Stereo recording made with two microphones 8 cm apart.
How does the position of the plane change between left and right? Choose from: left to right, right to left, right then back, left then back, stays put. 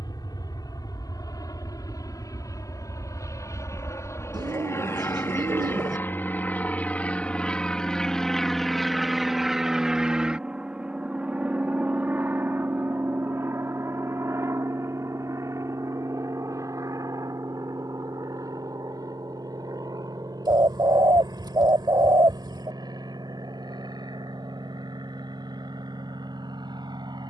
left to right.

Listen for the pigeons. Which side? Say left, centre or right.
right.